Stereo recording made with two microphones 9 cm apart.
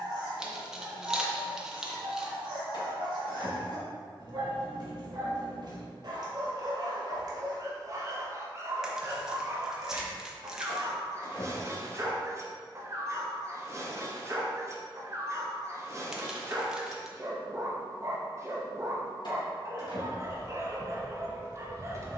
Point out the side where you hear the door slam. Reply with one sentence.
In this clip you hear the door slam on the left.